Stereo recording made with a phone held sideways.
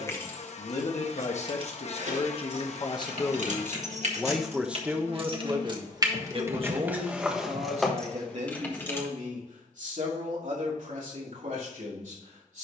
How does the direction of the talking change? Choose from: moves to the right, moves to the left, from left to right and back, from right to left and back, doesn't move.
moves to the right.